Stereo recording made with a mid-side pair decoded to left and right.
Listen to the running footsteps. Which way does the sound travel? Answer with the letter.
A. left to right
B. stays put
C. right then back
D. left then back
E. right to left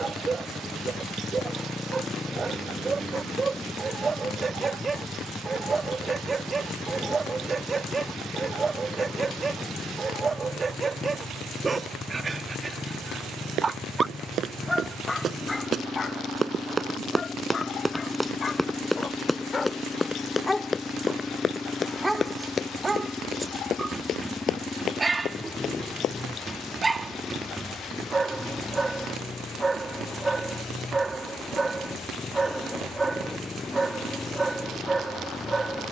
E.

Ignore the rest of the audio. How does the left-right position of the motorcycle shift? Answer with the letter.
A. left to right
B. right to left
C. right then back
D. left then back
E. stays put
E.